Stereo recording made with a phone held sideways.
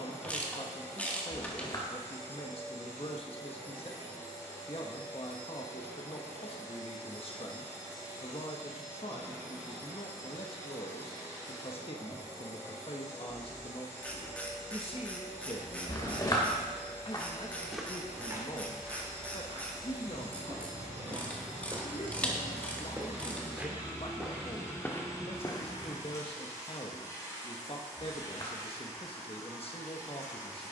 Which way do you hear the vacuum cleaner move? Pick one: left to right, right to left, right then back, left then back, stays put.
stays put.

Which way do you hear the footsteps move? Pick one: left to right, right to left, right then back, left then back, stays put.
right then back.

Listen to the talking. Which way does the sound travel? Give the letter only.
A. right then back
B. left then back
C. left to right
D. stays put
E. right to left
D.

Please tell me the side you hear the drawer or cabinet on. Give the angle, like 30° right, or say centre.
30° left.